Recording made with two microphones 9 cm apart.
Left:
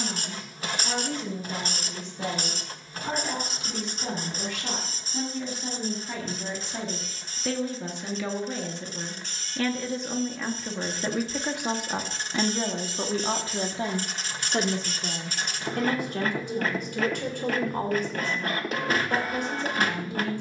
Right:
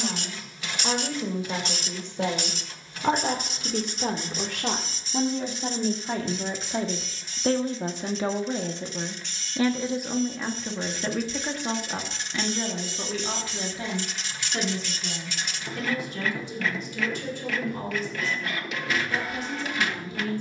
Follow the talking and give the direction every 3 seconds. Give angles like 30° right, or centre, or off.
70° right, 60° right, 40° right, centre, 30° left, 50° left, 60° left.